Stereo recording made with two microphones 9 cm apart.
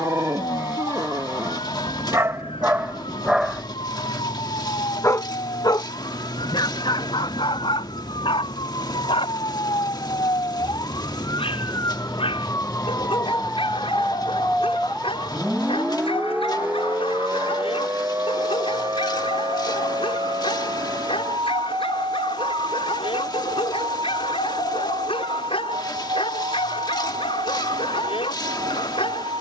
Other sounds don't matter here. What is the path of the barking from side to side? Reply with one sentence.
In this clip you hear the barking move from right to left.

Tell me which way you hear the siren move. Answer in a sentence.
You can hear the siren go from the left side to the right.